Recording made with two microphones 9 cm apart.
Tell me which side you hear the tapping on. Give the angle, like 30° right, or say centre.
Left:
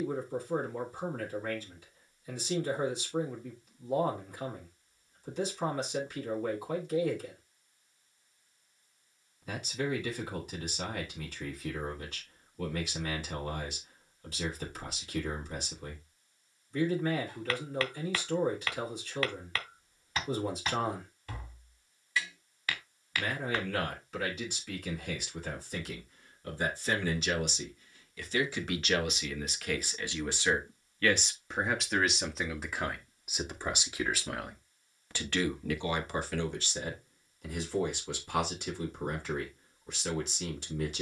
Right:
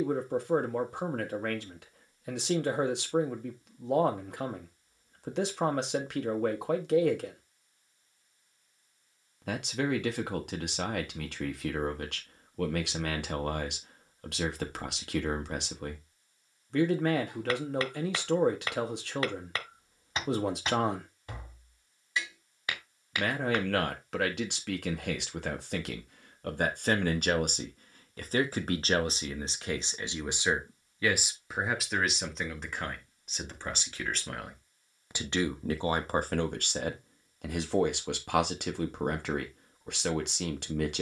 20° right.